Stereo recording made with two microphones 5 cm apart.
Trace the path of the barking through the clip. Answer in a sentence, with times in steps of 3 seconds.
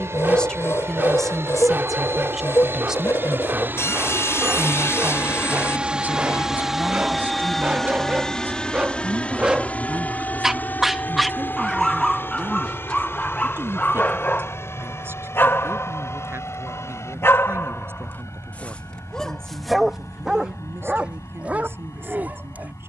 In this clip you hear the barking on the right from 0 s, in the centre from 9 s, on the left from 12 s, in the centre from 18 s and on the right from 21 s.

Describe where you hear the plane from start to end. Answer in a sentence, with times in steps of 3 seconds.
You can hear the plane on the right from 0 s, in the centre from 6 s and on the left from 9 s.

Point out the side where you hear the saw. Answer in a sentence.
In this clip you hear the saw on the left.